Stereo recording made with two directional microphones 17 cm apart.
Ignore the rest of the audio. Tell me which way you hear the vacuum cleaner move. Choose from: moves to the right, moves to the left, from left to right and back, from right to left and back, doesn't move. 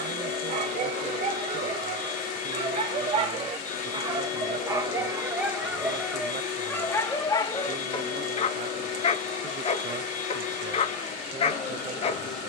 doesn't move.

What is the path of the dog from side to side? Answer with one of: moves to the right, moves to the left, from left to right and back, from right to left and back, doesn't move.
moves to the left.